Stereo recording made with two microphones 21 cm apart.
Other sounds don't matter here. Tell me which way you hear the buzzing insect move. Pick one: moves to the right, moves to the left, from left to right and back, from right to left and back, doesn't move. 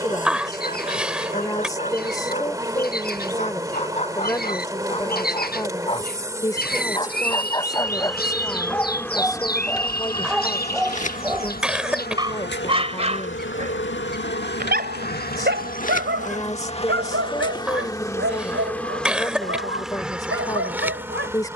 from right to left and back.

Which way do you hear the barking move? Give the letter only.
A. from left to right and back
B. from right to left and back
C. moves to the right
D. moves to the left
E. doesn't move
C.